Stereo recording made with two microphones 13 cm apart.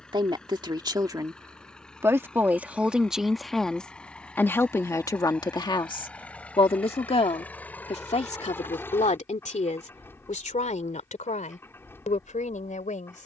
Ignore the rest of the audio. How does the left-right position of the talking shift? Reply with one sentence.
You can hear the talking go from the right side to the left.